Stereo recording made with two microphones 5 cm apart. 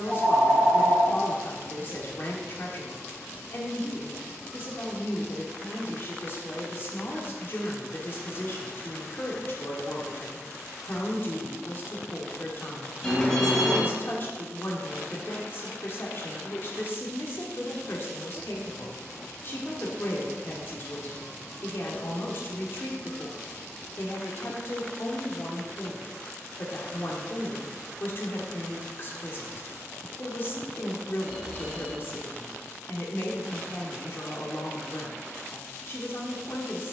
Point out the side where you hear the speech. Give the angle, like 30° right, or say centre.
40° left.